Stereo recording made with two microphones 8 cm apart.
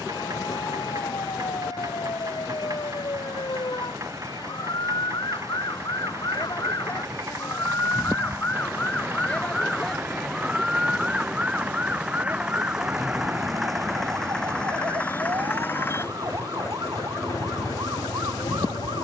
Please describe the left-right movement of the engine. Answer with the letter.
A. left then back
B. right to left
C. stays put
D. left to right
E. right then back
B.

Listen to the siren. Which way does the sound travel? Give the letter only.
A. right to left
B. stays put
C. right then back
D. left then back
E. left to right
E.